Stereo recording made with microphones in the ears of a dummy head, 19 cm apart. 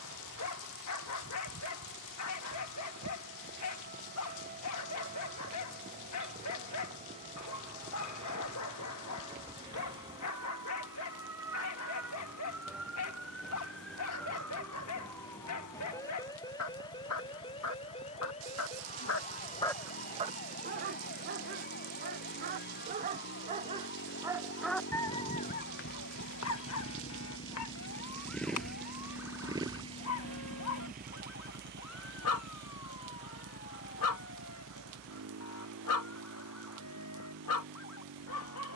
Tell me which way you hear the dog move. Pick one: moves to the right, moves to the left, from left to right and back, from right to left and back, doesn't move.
from left to right and back.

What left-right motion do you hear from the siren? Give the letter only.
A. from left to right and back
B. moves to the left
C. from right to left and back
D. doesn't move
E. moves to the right
B.